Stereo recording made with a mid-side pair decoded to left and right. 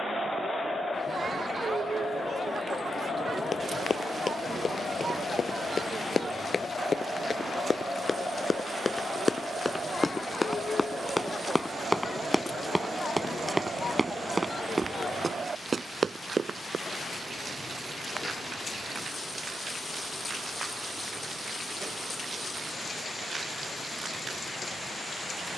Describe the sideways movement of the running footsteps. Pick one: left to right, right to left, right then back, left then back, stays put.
left to right.